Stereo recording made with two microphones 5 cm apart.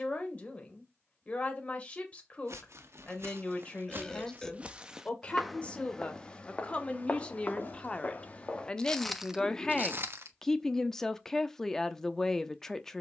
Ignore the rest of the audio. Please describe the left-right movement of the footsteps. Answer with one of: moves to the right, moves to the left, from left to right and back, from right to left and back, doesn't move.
from right to left and back.